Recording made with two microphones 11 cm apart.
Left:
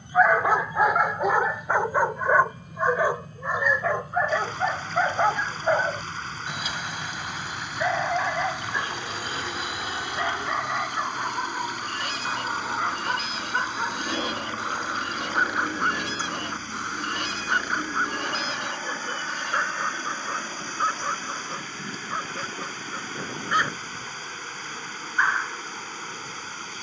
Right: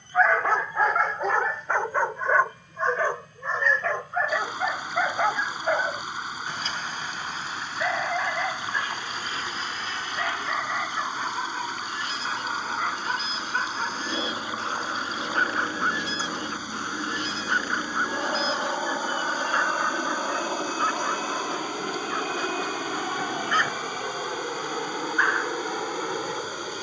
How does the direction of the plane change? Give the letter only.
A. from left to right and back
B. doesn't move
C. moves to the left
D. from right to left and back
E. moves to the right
E.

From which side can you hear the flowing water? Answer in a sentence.
In this clip you hear the flowing water in the centre.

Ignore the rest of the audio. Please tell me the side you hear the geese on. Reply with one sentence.
You can hear the geese on the left.